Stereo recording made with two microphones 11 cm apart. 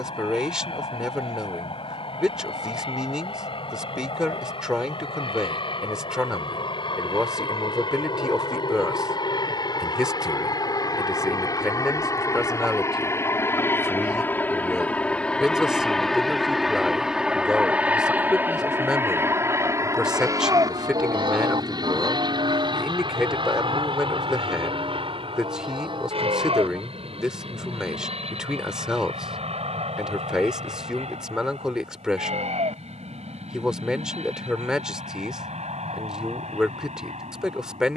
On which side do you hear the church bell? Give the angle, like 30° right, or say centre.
50° right.